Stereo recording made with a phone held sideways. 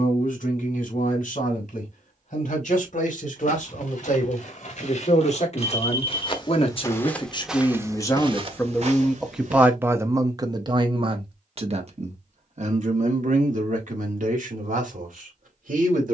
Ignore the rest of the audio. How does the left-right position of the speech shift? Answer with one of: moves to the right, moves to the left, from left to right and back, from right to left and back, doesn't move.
moves to the right.